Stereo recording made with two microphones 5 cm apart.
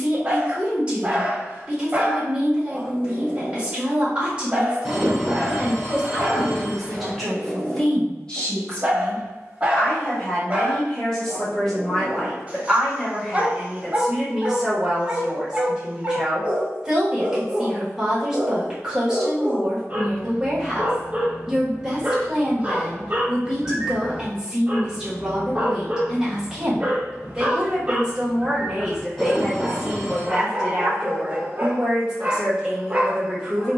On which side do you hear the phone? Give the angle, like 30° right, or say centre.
centre.